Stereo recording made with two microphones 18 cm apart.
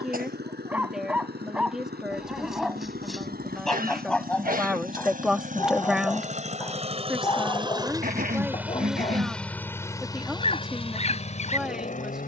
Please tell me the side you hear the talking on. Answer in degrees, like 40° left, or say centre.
centre.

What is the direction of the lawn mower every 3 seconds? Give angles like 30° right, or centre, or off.
70° right, 50° right, 30° right, 30° left.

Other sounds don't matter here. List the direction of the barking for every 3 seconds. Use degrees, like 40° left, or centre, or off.
centre, 10° left, 20° left, 40° left.